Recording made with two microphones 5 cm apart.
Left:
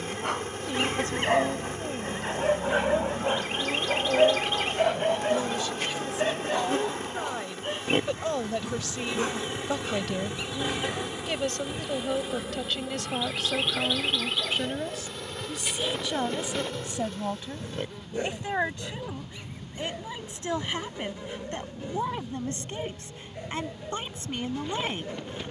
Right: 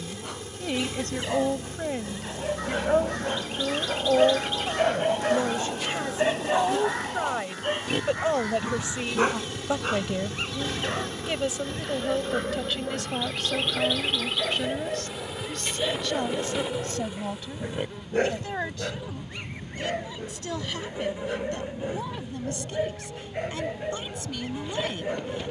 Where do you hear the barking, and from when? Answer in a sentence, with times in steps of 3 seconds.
In this clip you hear the barking on the left from 0 s, in the centre from 3 s and on the right from 6 s.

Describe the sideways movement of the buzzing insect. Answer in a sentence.
In this clip you hear the buzzing insect travel towards the right.